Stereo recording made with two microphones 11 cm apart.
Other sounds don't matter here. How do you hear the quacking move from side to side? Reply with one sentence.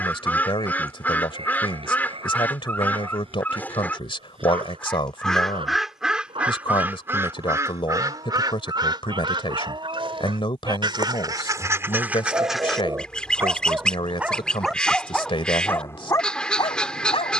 In this clip you hear the quacking go right and come back.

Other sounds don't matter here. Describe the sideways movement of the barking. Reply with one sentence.
In this clip you hear the barking move to the left.